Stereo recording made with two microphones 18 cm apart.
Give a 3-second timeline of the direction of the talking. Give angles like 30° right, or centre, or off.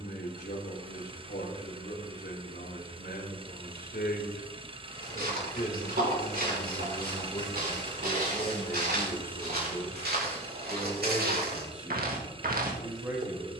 70° left, 60° left, 30° left, centre, 10° right.